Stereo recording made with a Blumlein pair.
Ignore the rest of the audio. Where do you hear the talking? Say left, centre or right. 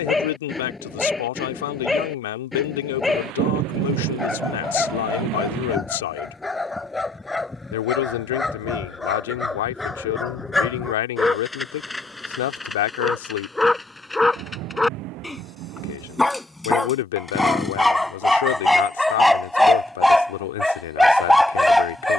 left.